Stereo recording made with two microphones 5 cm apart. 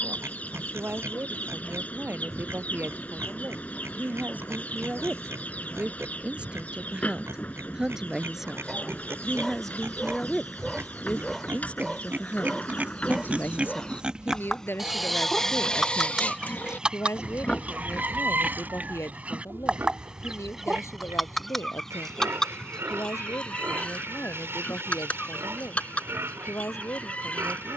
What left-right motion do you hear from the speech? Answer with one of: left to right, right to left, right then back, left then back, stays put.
right to left.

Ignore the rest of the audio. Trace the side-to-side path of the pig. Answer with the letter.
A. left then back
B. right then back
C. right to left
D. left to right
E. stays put
A.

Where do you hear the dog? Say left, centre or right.
centre.